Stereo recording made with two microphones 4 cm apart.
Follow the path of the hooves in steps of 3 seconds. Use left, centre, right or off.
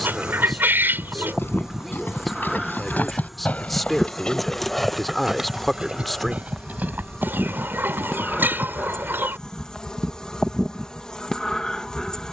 left, centre, right, off.